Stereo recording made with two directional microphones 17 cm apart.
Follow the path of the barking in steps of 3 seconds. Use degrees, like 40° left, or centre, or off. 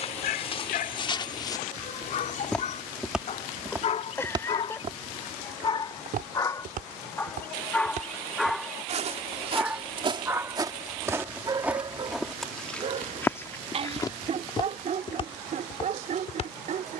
60° left, 40° left, 10° left, 20° right, 40° right, 50° right.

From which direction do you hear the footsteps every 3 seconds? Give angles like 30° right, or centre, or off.
30° left, 30° right, 50° right, 20° right, 10° left, 40° left.